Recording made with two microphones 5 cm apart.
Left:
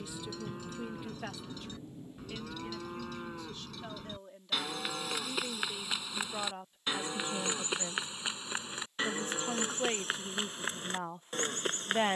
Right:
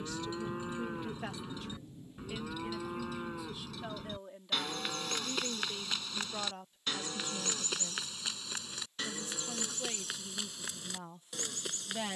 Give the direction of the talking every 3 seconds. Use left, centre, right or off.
centre, centre, left, left.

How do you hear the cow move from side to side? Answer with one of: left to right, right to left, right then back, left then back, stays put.
right to left.